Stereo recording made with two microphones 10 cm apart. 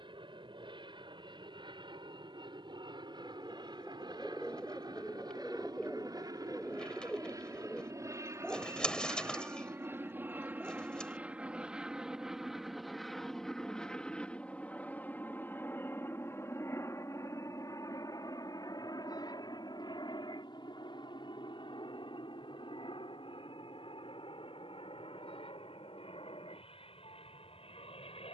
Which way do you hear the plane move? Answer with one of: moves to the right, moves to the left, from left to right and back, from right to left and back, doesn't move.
moves to the left.